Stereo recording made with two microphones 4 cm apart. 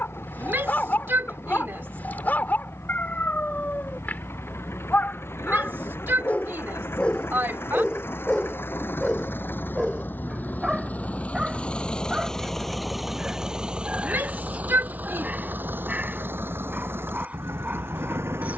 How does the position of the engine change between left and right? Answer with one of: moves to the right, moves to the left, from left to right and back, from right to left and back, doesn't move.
moves to the right.